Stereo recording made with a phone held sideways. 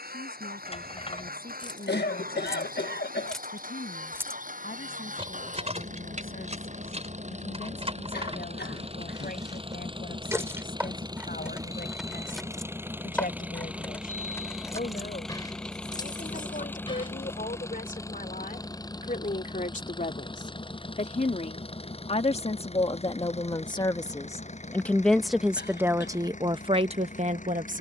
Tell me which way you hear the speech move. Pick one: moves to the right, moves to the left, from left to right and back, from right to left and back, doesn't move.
moves to the right.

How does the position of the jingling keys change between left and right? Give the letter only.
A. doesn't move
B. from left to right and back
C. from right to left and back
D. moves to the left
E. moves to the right
B.